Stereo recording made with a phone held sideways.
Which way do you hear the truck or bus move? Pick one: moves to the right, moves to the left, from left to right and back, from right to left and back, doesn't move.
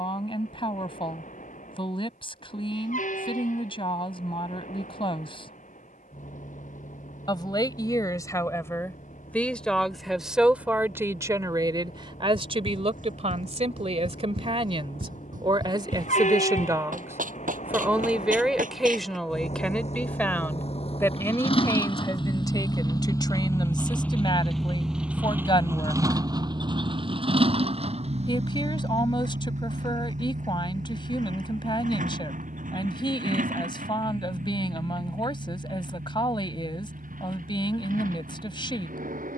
moves to the right.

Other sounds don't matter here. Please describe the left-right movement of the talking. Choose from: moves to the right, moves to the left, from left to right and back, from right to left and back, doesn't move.
from left to right and back.